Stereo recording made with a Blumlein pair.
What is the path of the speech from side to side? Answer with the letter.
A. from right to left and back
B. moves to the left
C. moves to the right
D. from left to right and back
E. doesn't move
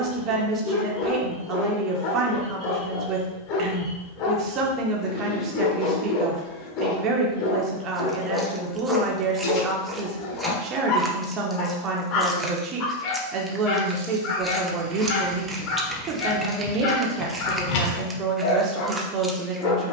E.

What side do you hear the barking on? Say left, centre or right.
left.